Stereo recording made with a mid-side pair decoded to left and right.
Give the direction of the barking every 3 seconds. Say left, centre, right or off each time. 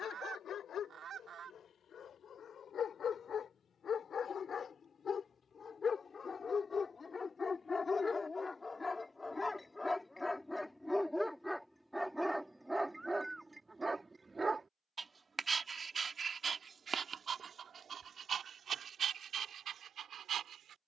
left, left, left, centre, centre, right, right.